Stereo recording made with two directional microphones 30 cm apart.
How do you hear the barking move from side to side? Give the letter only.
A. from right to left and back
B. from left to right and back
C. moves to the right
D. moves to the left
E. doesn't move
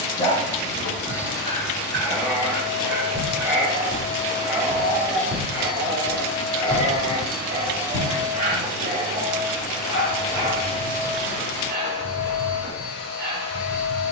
C.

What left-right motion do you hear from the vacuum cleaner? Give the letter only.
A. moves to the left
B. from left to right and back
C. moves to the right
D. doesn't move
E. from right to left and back
B.